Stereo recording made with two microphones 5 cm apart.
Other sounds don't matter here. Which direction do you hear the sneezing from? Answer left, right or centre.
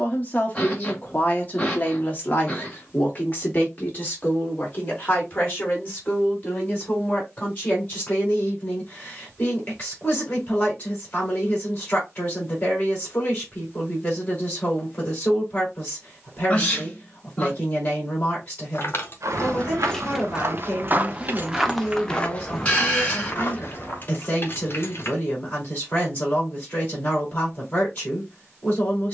left.